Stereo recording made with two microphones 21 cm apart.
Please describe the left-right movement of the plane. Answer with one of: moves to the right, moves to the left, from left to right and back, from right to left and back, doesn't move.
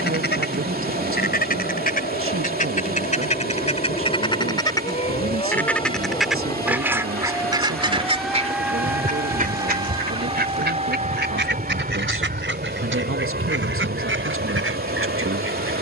moves to the right.